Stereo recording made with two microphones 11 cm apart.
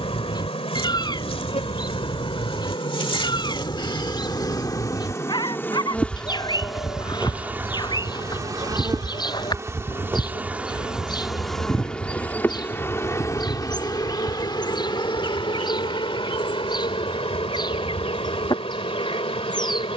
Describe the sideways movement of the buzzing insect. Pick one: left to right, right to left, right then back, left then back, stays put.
right then back.